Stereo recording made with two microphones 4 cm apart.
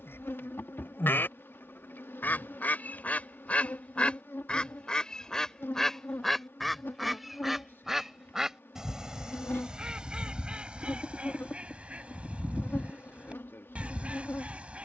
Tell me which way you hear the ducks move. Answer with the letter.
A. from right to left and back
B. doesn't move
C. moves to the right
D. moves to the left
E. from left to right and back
C.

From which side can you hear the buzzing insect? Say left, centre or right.
left.